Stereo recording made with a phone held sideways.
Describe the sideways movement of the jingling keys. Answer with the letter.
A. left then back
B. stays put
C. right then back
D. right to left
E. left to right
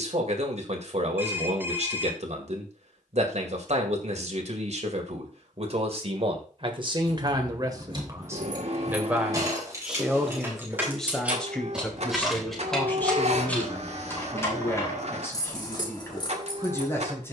D.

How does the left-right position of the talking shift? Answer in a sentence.
You can hear the talking move from right to left.